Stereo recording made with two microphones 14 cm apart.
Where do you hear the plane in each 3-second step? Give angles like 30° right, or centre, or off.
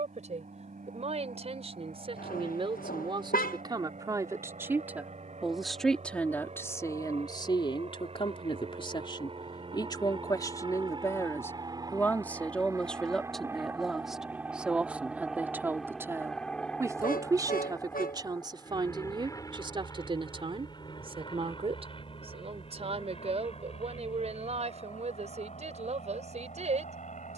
70° right, 60° right, 50° right, 40° right, 20° right, centre, 20° left, 40° left, 50° left.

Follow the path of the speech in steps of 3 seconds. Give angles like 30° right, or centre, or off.
40° right, 20° right, 30° left, 20° left, centre, 20° right, 30° right, 40° right, 50° right.